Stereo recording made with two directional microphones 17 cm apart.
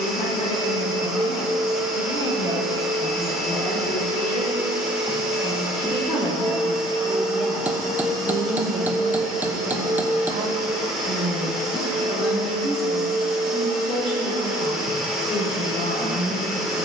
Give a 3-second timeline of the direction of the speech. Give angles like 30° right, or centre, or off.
50° left, 40° left, 10° right, 40° right, 30° left, 50° left.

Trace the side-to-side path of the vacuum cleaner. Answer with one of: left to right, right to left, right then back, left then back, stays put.
stays put.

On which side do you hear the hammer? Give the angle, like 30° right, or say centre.
10° right.